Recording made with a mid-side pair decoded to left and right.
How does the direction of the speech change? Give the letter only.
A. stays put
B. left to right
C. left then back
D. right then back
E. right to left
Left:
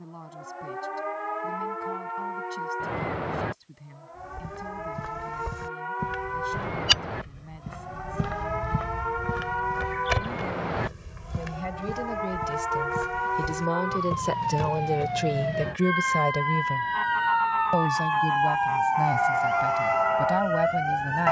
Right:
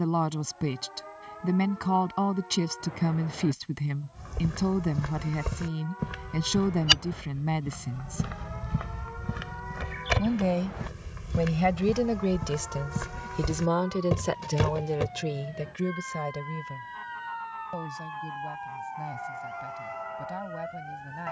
E.